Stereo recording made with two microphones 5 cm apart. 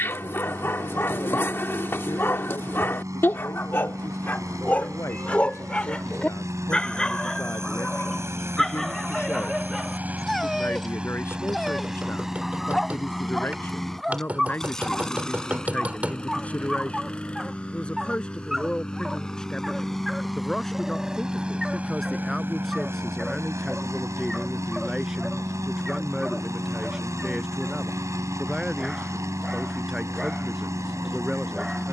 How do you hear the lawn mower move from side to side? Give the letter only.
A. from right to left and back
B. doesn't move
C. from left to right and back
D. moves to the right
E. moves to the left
A.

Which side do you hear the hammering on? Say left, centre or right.
right.